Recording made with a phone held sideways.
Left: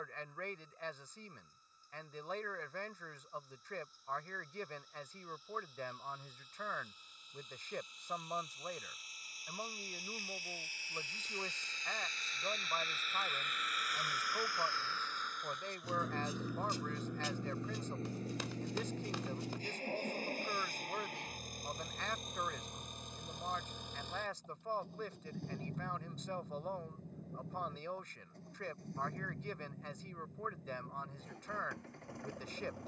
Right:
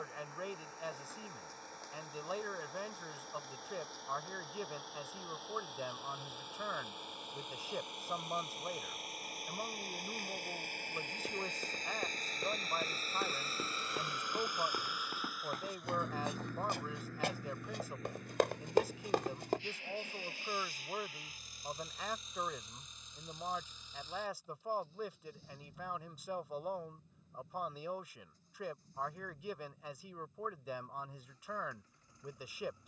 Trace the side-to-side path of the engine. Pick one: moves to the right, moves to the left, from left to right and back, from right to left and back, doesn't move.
moves to the left.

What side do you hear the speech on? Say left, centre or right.
centre.